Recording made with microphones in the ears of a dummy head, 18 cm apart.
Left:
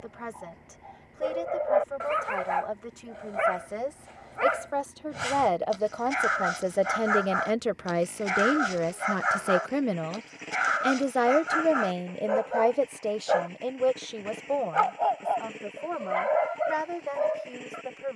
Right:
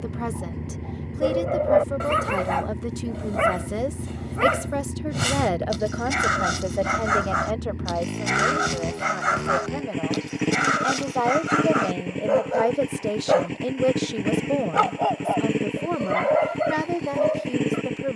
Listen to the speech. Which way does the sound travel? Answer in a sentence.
You can hear the speech move from right to left and back again.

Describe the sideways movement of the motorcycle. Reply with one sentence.
You can hear the motorcycle stay in one place.